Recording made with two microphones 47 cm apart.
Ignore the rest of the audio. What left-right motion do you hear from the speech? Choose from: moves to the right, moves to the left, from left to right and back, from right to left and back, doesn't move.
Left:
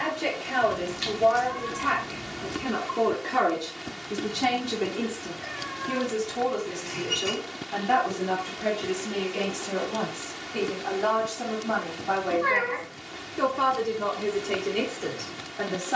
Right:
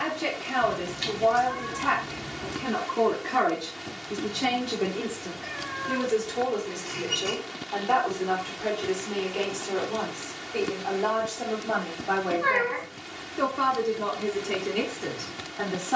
from right to left and back.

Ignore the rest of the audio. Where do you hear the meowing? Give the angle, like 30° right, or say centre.
centre.